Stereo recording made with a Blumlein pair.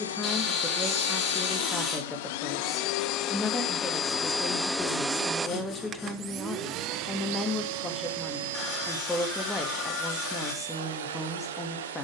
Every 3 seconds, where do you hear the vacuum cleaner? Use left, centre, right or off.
left, centre, right, right.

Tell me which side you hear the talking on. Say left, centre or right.
centre.